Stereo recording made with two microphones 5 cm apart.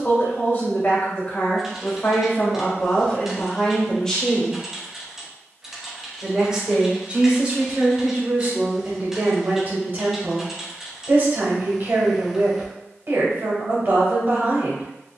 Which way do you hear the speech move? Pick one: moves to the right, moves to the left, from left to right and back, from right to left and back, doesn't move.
moves to the right.